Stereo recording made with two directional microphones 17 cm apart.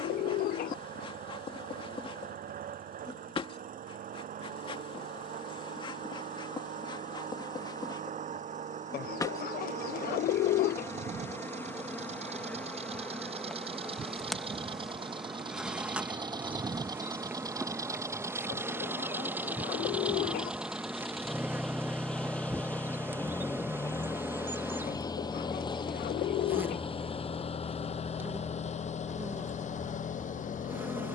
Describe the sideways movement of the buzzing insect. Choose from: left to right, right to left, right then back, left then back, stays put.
left to right.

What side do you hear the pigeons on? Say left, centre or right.
left.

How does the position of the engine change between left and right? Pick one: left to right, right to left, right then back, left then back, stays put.
right to left.